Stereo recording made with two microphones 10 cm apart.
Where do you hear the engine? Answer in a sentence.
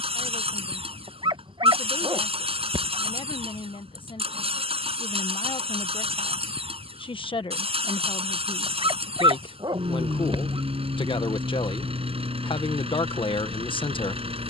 In this clip you hear the engine on the right.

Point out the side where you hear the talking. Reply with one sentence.
In this clip you hear the talking on the left.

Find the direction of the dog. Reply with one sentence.
You can hear the dog on the right.